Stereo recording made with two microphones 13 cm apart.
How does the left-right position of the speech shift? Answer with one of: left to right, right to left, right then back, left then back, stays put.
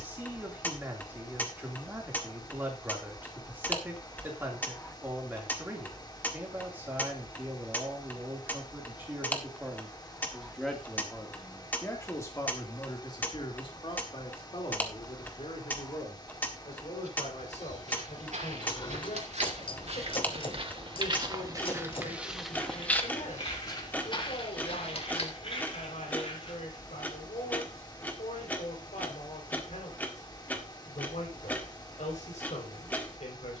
right to left.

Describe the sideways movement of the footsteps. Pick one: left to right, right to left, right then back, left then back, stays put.
right to left.